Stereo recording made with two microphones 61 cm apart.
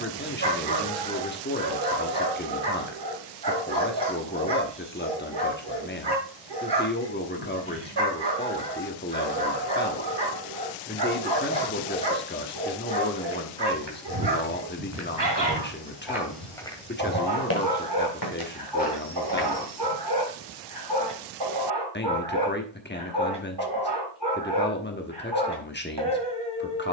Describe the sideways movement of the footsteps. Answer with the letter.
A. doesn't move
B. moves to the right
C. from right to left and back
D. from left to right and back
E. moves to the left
E.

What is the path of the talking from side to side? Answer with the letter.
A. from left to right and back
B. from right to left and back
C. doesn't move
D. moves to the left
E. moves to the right
C.